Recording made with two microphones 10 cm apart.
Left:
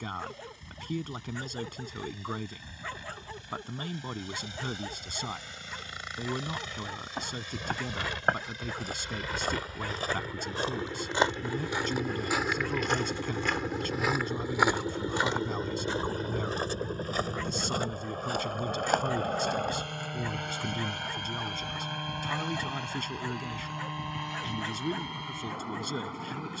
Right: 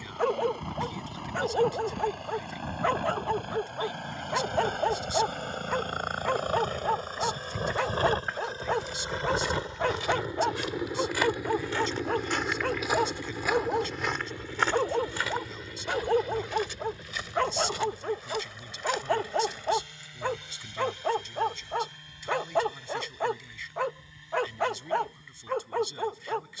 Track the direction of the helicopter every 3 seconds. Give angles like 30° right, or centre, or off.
60° right, 50° right, 40° right, 20° right, 10° left, 40° left, 50° left, 60° left, 70° left.